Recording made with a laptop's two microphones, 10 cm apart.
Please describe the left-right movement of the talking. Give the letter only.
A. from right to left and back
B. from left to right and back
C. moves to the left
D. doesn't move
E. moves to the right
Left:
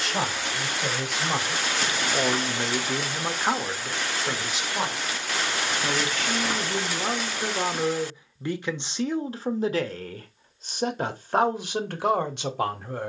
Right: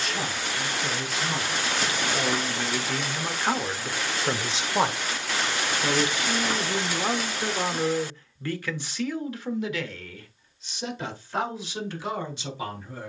B.